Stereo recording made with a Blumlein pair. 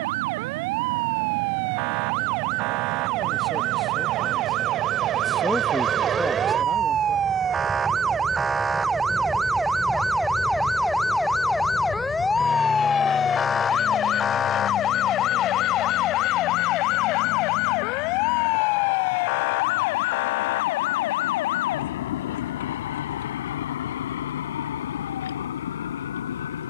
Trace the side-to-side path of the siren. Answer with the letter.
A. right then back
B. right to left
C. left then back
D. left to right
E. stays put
B.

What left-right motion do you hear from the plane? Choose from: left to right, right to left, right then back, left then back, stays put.
right to left.